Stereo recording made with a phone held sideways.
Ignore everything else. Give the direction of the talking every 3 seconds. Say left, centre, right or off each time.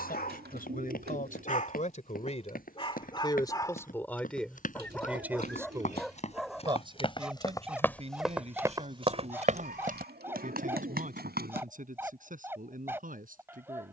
left, centre, right, right, right.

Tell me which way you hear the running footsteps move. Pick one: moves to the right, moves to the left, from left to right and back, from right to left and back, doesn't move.
moves to the right.